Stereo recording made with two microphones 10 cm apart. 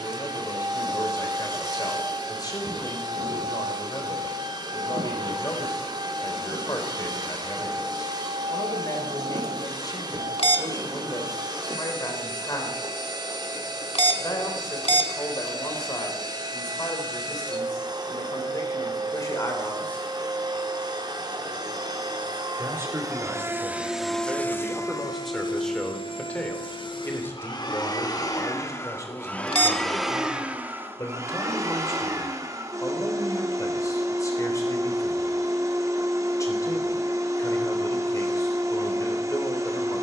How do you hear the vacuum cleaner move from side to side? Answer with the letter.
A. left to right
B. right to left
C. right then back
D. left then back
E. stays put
D.